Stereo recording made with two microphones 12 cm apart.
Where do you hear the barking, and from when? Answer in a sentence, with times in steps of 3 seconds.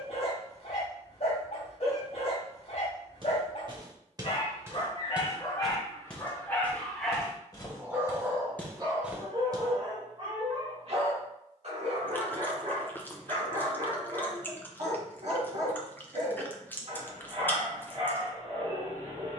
In this clip you hear the barking on the left from 0 s, in the centre from 6 s and on the right from 9 s.